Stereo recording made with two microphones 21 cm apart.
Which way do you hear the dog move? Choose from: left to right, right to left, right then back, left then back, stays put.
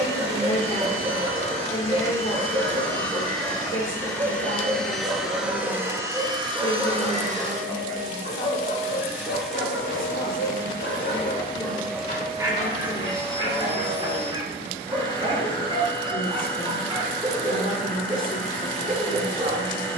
left then back.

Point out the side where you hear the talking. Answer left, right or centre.
left.